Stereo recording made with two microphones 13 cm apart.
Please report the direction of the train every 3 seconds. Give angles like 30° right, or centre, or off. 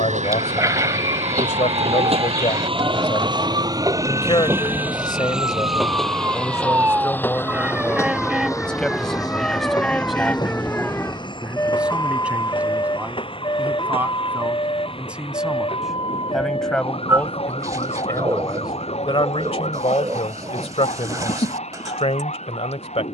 60° right, 20° right, 20° left, 30° left, 40° left, 50° left, 50° left, 50° left.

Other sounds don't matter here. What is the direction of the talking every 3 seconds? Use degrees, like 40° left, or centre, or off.
60° left, 40° left, 10° left, centre, 10° right, centre, 50° left, 50° left.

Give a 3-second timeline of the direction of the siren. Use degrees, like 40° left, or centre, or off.
50° right, 40° right, 10° right, 10° left, 30° left, 50° left, 50° left, 60° left.